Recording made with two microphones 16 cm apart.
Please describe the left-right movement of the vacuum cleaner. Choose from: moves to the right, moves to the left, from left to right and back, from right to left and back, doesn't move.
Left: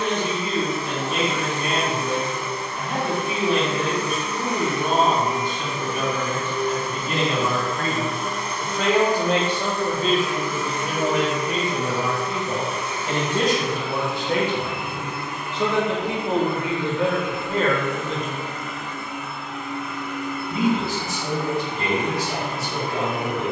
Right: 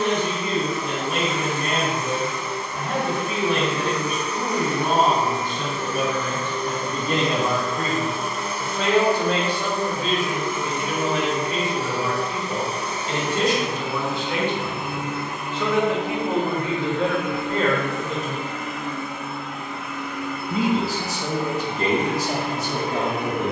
moves to the right.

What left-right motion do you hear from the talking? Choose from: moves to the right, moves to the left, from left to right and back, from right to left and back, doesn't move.
from right to left and back.